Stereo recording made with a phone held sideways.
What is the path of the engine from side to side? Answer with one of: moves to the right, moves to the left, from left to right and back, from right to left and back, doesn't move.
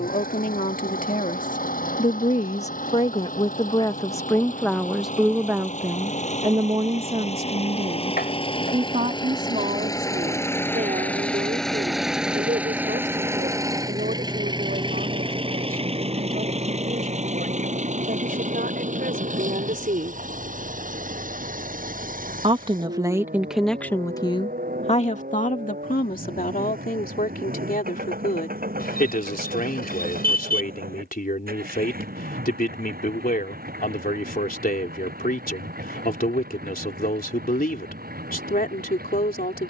moves to the right.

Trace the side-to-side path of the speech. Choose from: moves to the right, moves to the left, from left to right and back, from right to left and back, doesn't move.
from left to right and back.